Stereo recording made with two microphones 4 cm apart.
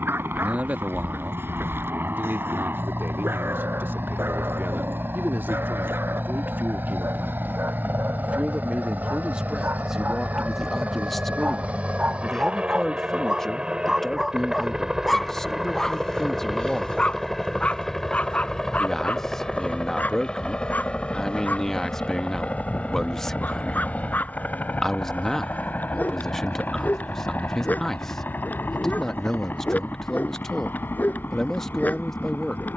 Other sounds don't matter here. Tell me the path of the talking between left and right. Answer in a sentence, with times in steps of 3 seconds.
In this clip you hear the talking on the right from 0 s and in the centre from 9 s.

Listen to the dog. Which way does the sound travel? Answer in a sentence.
In this clip you hear the dog travel towards the left.